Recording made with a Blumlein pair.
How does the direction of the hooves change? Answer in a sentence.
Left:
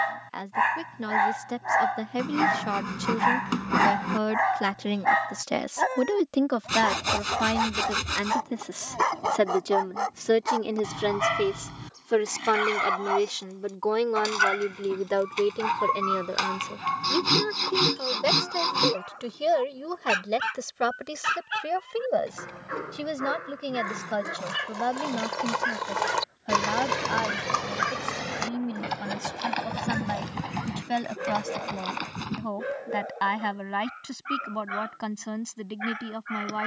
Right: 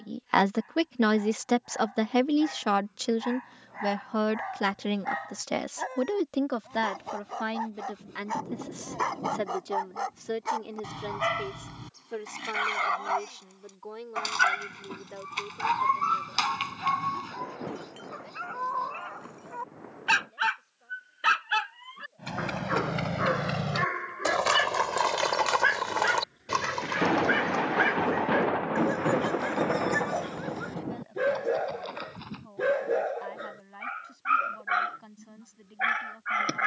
In this clip you hear the hooves move to the left.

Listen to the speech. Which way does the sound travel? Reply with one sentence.
You can hear the speech go from the right side to the left.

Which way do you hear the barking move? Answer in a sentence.
In this clip you hear the barking travel towards the right.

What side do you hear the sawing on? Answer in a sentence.
You can hear the sawing on the left.